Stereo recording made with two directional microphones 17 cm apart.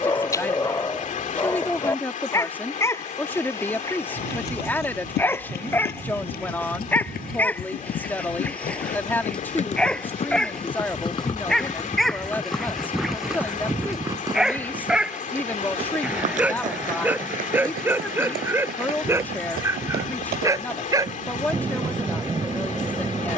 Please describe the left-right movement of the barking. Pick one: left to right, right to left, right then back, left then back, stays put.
left to right.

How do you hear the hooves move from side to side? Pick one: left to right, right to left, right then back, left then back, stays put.
left to right.